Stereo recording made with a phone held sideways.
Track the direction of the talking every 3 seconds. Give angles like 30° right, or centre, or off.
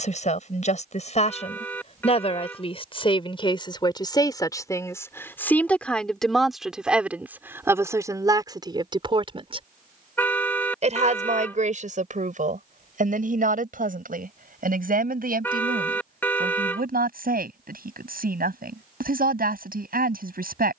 40° left, 20° left, 10° right, 50° right, 60° right, 70° right, 70° right.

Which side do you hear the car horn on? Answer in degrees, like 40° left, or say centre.
10° left.